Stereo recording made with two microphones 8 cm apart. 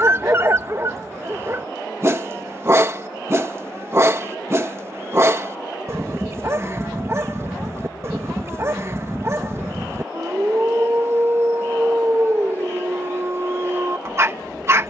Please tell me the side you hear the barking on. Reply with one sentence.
You can hear the barking on the right.